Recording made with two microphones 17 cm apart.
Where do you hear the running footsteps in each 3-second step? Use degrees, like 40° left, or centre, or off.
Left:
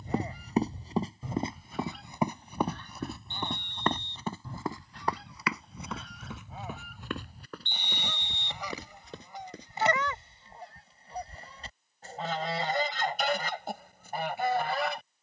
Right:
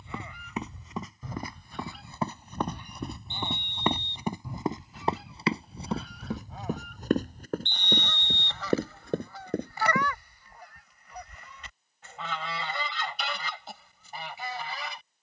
20° left, 20° right, 40° right, 50° right, off.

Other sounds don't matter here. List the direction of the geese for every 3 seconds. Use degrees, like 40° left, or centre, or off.
10° left, 10° right, 10° left, 30° left, 50° left.